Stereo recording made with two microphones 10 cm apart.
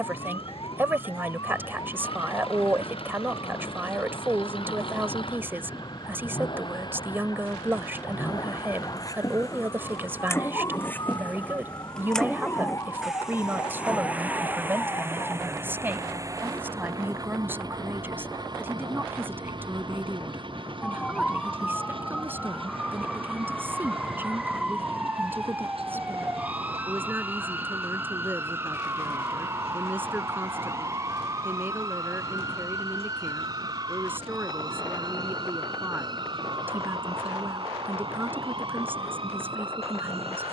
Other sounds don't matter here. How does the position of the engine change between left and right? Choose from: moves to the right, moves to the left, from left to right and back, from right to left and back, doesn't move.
moves to the right.